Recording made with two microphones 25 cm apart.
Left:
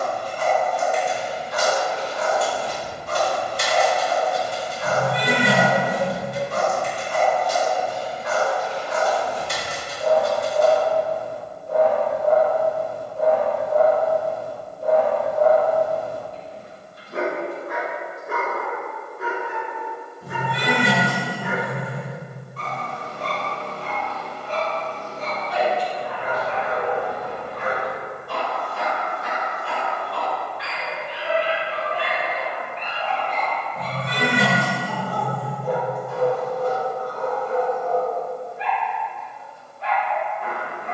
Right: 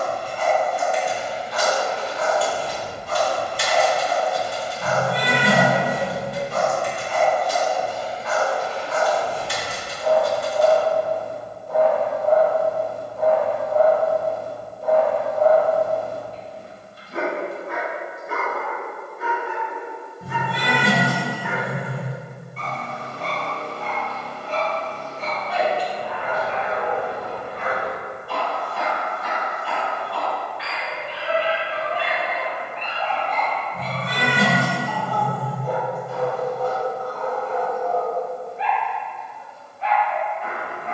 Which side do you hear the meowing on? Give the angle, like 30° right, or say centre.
60° right.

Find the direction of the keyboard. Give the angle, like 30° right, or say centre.
50° left.